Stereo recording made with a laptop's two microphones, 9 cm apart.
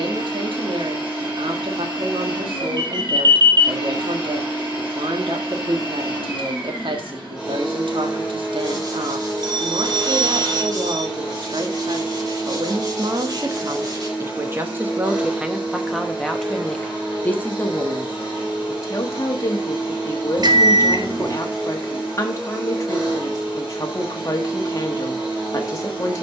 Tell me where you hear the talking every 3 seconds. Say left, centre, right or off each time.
right, right, right, right, right, centre, left, left, left.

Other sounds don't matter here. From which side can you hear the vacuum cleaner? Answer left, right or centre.
centre.